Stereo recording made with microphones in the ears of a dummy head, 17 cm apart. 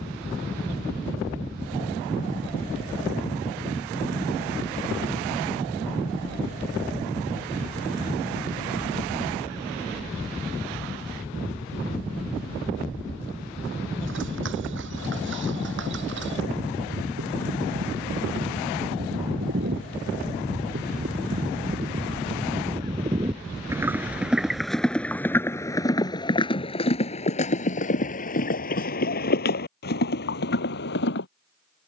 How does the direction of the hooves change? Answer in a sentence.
In this clip you hear the hooves travel towards the left.